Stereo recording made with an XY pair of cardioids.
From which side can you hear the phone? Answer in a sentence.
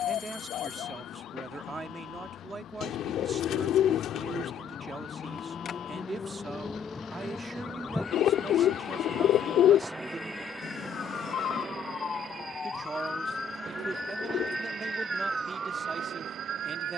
In this clip you hear the phone on the left.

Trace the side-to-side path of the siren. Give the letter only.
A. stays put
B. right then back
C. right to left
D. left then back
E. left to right
E.